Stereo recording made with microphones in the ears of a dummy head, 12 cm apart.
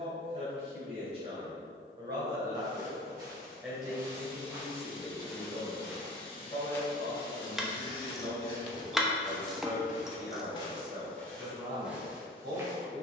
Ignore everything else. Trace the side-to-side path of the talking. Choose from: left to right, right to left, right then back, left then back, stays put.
left then back.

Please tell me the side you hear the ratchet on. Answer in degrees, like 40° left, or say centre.
centre.